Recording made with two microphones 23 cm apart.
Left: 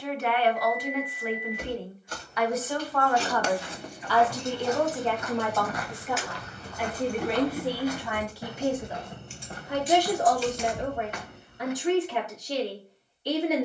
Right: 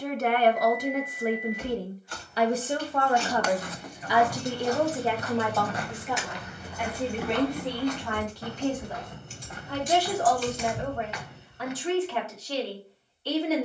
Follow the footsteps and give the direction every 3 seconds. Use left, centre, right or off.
off, right, centre, left, off.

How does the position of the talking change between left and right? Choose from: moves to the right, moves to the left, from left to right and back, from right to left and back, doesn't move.
moves to the left.